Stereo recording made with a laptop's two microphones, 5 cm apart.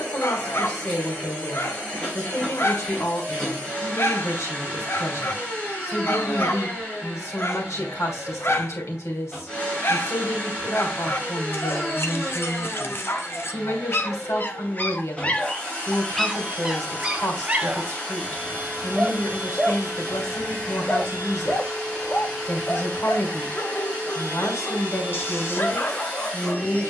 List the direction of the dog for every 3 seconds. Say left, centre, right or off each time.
left, left, left, left, left, centre, centre, left, left.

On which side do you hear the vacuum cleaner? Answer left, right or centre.
left.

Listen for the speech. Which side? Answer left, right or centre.
left.